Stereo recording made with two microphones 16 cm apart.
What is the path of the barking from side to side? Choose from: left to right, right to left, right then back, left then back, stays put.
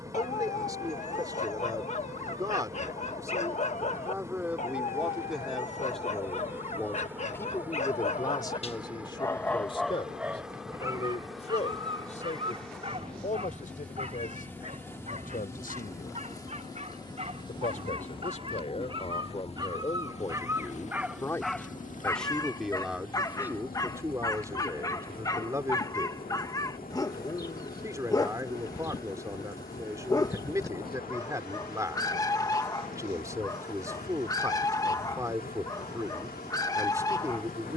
right then back.